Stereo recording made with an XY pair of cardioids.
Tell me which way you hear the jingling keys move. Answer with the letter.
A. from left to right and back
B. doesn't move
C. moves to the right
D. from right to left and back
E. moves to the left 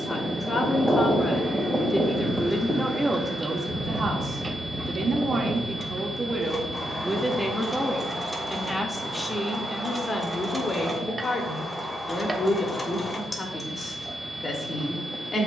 A.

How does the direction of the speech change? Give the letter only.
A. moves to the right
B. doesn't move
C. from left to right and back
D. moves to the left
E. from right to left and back
C.